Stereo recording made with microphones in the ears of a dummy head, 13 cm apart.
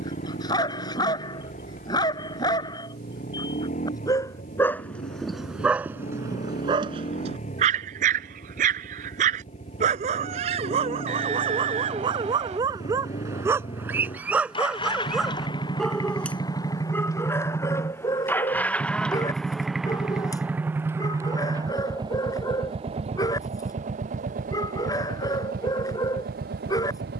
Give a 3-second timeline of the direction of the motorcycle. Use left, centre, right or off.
left, left, left, left, left, left, centre, right, right.